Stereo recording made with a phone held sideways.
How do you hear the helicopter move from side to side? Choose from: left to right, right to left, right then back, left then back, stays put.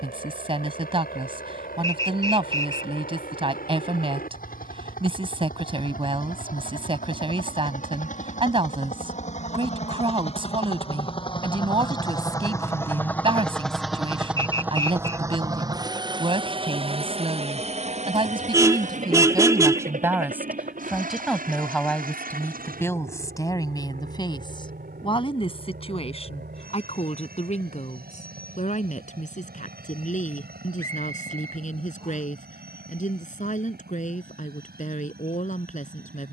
left to right.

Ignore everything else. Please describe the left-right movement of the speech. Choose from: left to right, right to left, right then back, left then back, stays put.
right to left.